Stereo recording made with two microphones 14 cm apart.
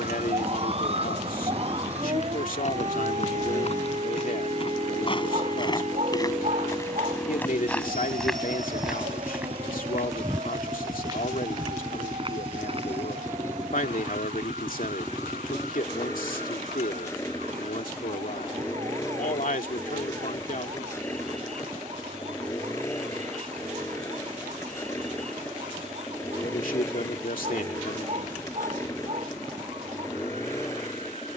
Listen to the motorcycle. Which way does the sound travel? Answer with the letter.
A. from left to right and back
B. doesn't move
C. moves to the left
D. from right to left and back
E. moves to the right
B.